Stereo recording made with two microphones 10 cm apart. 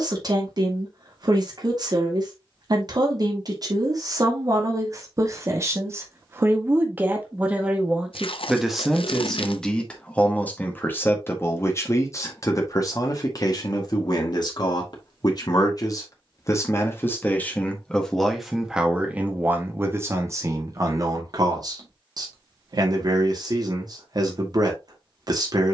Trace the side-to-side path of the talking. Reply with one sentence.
You can hear the talking move from right to left and back again.